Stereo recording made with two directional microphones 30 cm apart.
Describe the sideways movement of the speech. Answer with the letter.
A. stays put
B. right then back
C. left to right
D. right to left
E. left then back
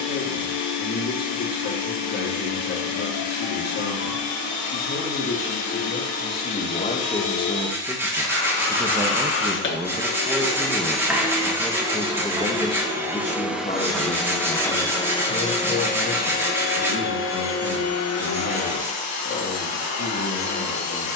B.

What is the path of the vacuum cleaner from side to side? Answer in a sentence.
In this clip you hear the vacuum cleaner move from left to right and back again.